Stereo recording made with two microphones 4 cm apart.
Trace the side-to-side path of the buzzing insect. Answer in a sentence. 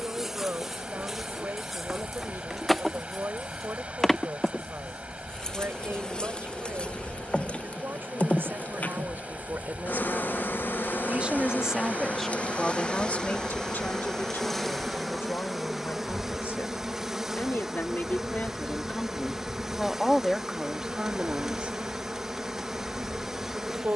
In this clip you hear the buzzing insect go left and come back.